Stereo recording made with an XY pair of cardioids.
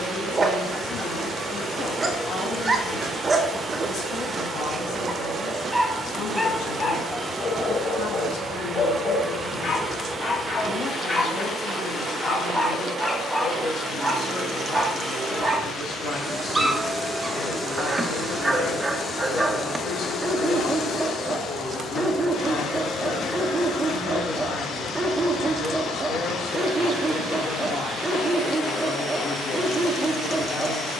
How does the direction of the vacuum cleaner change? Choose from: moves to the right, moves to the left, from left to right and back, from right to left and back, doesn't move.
moves to the left.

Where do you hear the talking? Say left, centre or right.
left.